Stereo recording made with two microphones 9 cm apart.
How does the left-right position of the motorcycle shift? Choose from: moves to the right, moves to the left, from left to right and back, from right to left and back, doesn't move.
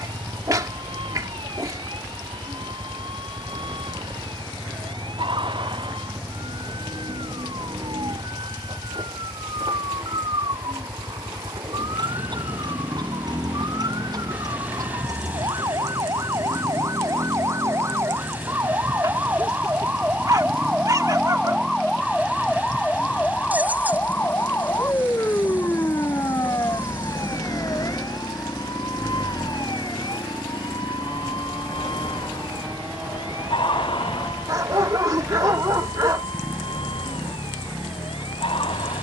doesn't move.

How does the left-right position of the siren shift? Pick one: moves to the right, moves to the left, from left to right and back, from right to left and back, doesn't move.
moves to the left.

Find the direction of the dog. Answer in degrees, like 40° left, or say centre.
40° right.